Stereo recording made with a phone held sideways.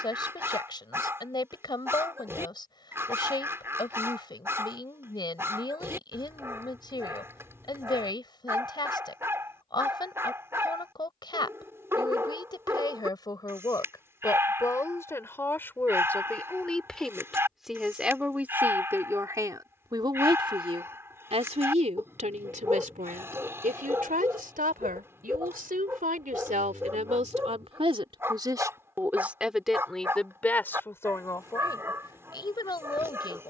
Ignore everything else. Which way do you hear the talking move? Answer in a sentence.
You can hear the talking move from left to right and back again.